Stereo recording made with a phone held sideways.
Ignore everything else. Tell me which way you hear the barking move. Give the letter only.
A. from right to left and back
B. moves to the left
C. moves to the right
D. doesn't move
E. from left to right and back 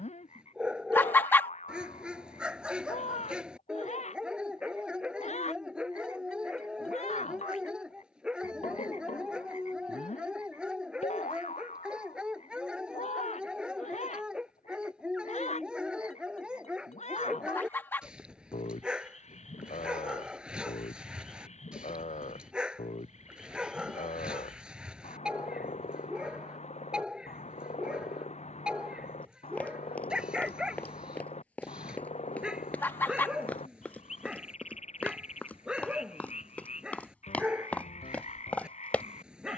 D.